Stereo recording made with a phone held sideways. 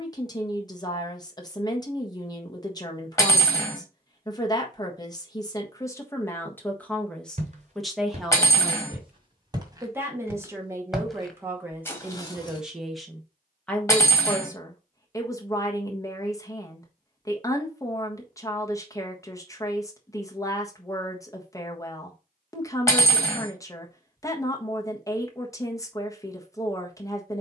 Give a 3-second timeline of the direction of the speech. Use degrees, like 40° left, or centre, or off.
30° left, 20° left, centre, 20° right, 10° left, 20° left, 20° left, 20° left, 20° left.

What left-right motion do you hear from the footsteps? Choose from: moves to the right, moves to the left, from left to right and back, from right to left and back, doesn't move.
moves to the left.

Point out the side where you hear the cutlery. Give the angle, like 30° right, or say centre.
20° left.